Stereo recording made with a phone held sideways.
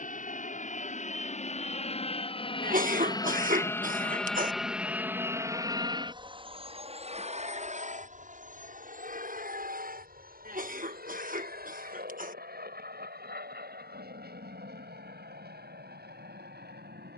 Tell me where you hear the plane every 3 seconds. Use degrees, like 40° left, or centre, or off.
50° left, centre, 40° right, 60° right, 70° right, 70° right.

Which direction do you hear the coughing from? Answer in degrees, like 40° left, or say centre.
60° right.